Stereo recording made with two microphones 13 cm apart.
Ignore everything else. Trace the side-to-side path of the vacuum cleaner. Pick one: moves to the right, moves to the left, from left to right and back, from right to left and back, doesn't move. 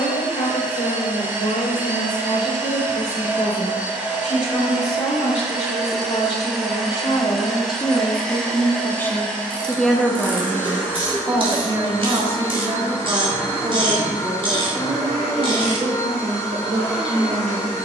moves to the left.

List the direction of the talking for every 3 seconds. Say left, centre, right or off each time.
left, left, left, centre, right, right.